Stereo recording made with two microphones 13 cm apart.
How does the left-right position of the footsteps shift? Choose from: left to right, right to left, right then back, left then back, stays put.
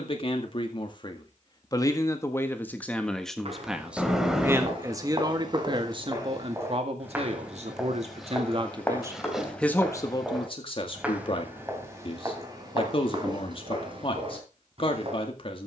left then back.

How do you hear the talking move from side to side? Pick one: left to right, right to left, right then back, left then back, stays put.
right then back.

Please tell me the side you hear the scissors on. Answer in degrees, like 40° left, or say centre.
centre.